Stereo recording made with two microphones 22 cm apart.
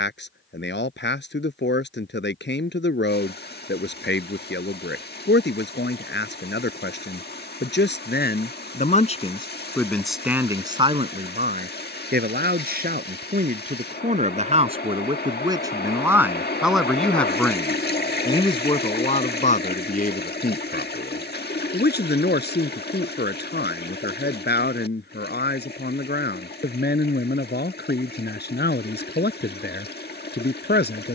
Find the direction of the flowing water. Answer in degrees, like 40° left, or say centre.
50° left.